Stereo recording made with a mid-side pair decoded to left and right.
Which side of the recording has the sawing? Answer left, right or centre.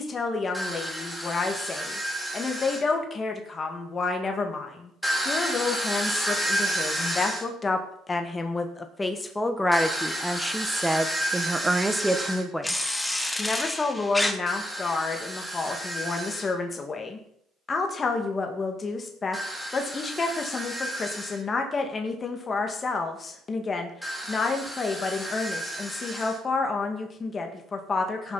centre.